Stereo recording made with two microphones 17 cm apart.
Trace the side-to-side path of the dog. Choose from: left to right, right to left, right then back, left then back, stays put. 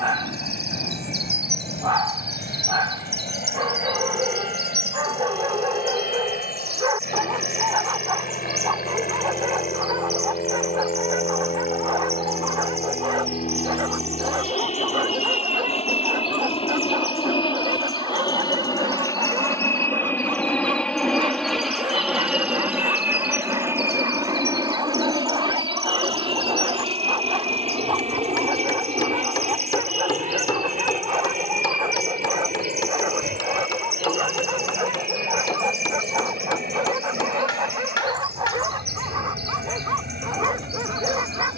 stays put.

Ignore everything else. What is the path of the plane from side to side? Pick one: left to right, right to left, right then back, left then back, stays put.
left to right.